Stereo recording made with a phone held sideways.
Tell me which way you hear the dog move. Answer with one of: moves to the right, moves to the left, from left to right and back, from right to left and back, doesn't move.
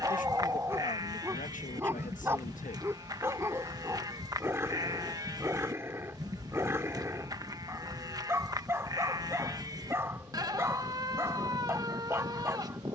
doesn't move.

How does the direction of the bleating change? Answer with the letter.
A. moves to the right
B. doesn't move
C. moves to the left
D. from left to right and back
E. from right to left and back
B.